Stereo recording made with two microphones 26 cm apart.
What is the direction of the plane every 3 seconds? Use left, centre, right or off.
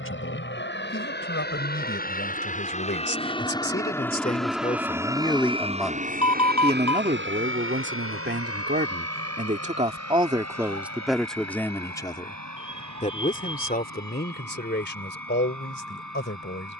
left, centre, right, right, right, right.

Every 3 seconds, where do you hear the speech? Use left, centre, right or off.
left, left, right, centre, left, left.